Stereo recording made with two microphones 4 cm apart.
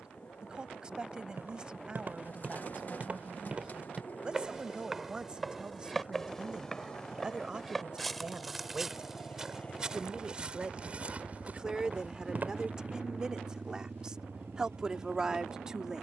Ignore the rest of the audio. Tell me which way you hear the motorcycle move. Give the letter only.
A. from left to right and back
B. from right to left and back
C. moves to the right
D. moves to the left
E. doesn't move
C.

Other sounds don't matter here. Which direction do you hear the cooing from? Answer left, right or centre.
left.